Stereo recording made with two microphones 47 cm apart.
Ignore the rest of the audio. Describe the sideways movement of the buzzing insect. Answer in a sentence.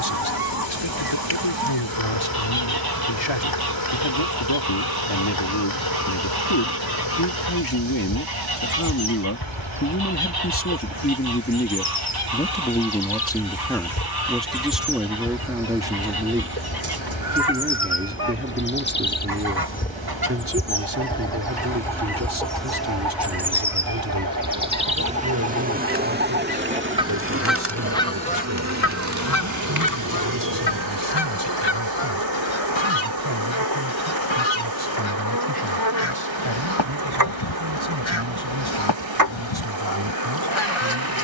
You can hear the buzzing insect move to the right.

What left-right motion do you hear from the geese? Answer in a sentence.
You can hear the geese move from right to left.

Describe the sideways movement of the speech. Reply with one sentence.
You can hear the speech go from the left side to the right.